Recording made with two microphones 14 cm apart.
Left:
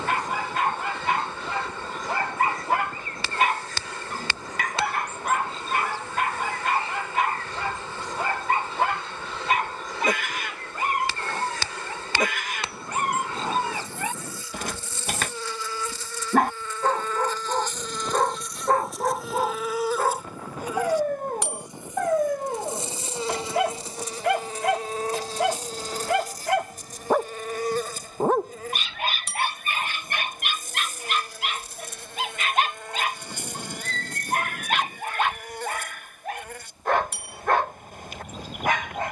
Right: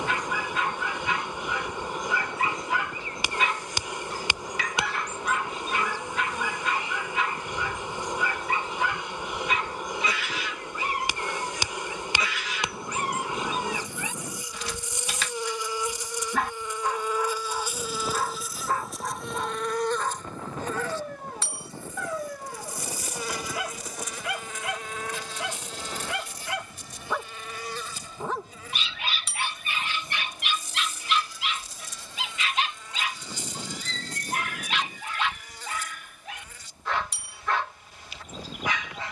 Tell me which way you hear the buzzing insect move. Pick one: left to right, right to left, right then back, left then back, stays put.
right to left.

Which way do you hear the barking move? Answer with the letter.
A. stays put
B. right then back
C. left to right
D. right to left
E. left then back
A.